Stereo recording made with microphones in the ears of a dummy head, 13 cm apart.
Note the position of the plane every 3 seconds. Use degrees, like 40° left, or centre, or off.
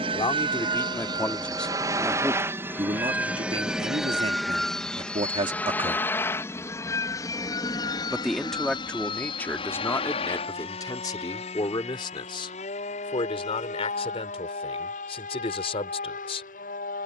20° right, centre, 20° left, 40° left, 40° left, 50° left.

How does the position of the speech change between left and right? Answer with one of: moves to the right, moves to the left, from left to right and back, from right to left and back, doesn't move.
from left to right and back.